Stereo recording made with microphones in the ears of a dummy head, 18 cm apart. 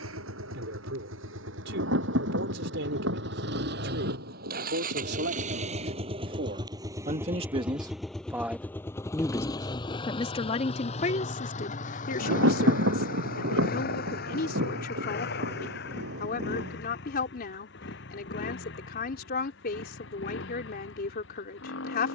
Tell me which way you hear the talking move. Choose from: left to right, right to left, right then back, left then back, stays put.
right to left.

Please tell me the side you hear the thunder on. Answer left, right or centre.
right.